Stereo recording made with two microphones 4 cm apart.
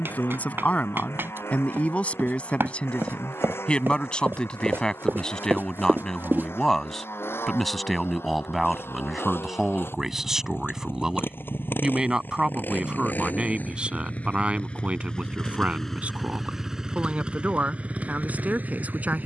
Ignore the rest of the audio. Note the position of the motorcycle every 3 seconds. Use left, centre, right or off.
left, left, left, left, left, centre, right.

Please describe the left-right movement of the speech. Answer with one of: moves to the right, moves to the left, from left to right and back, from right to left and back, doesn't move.
moves to the right.